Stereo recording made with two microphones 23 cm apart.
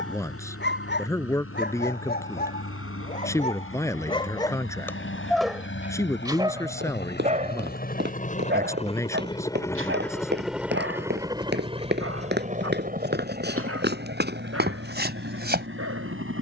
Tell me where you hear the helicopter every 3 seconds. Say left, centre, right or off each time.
left, left, left, centre, right, right.